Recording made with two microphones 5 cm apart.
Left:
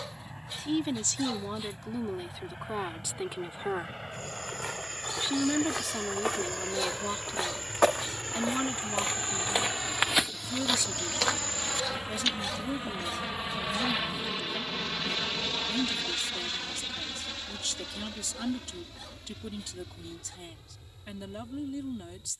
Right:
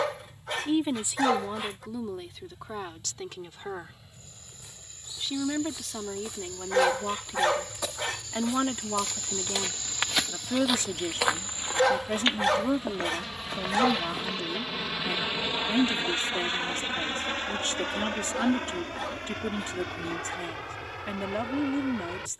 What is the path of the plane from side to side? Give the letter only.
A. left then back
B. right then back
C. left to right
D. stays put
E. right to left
C.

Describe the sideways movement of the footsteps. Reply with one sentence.
In this clip you hear the footsteps move to the right.